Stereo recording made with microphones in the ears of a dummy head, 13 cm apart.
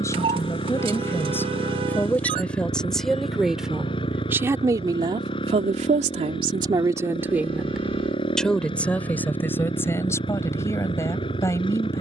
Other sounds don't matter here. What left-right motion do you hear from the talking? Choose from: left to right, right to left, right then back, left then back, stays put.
right then back.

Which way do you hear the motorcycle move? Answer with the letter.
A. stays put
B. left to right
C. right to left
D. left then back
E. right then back
A.